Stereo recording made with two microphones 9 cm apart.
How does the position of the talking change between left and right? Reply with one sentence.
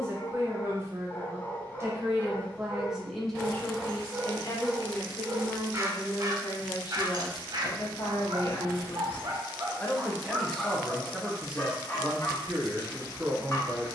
In this clip you hear the talking move from right to left and back again.